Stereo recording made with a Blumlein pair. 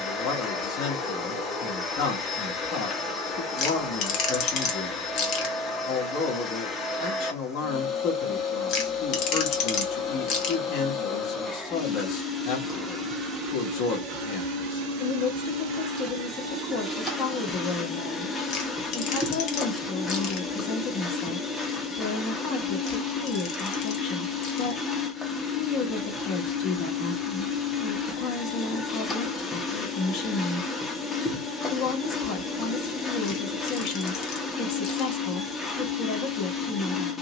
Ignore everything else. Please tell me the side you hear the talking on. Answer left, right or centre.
left.